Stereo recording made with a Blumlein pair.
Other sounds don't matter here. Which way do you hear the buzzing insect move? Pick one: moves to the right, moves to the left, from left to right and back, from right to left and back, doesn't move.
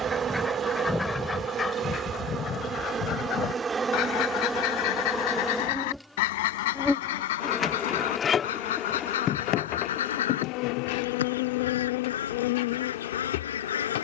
moves to the left.